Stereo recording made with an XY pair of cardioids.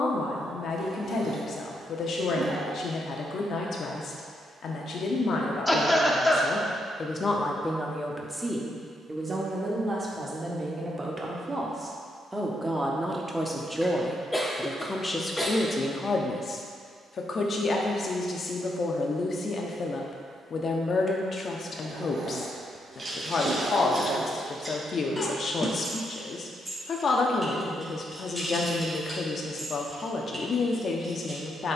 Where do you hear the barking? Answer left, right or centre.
right.